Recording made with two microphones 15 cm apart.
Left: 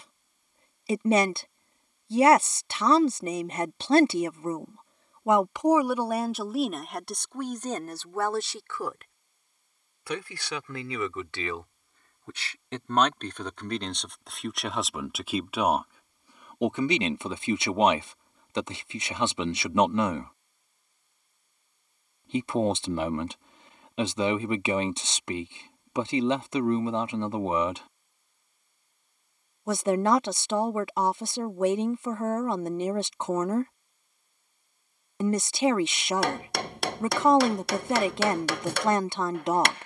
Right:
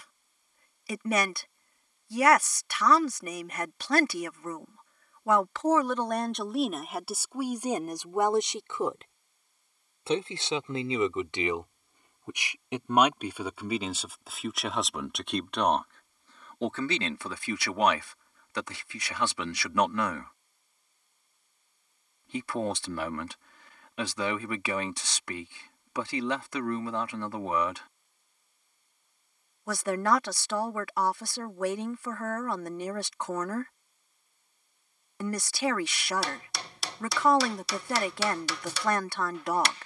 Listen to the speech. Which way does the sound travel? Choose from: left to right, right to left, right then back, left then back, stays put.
right then back.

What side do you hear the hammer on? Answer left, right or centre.
left.